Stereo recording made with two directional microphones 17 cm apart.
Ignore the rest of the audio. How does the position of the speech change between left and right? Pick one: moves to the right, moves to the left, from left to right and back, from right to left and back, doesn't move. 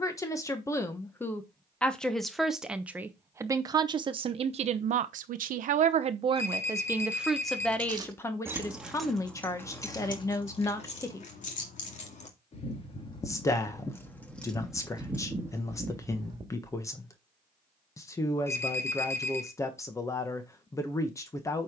from left to right and back.